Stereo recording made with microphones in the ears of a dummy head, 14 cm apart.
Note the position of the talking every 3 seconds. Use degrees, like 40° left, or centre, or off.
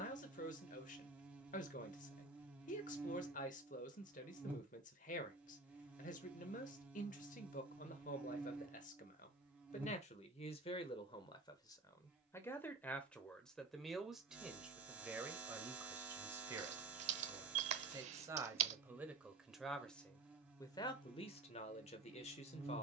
50° left, 50° left, 50° left, 40° left, 10° left, 20° right, centre, 40° left.